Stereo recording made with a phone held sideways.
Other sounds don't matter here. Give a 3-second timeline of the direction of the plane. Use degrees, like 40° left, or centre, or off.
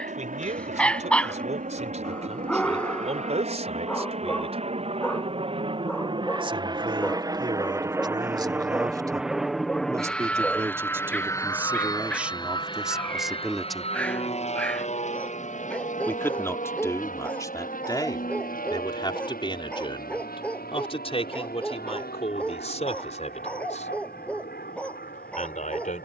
60° right, 40° right, 20° right, 10° left, 40° left, 50° left, 60° left, 70° left, 70° left.